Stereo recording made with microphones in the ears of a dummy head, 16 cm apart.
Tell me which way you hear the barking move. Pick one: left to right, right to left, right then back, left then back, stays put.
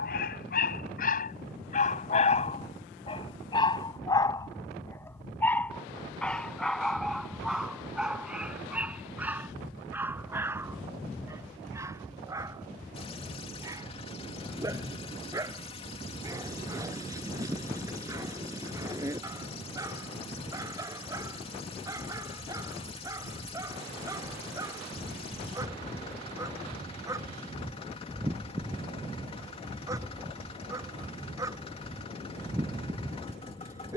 left to right.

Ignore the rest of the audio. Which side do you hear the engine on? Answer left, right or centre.
left.